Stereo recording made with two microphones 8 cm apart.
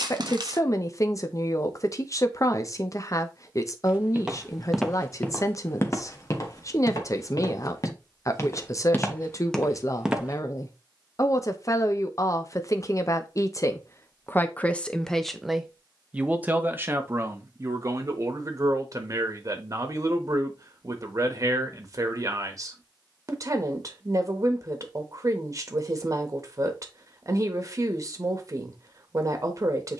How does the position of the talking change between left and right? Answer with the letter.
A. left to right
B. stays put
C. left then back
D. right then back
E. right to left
A.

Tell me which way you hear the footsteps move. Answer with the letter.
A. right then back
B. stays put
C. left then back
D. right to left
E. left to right
C.